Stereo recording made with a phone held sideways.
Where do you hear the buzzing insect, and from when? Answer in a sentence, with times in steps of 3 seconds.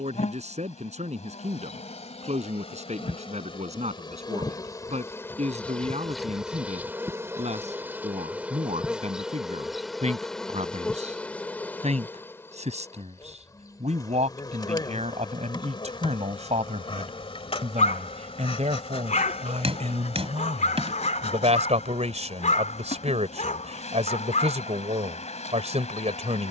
You can hear the buzzing insect on the left from 0 s, in the centre from 6 s and on the left from 12 s.